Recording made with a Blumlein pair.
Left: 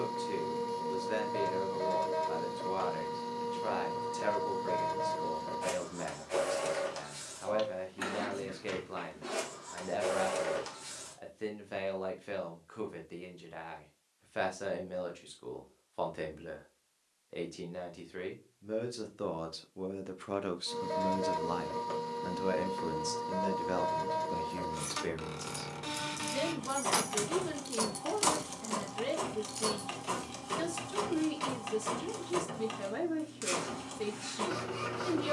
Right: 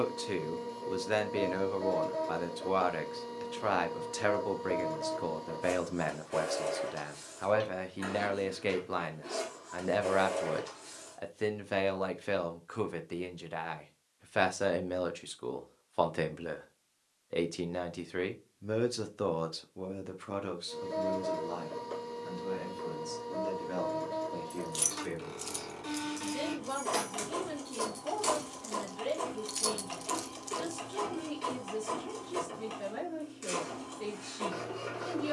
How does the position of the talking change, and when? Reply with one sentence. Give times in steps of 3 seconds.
You can hear the talking on the right from 0 s, in the centre from 18 s and on the left from 21 s.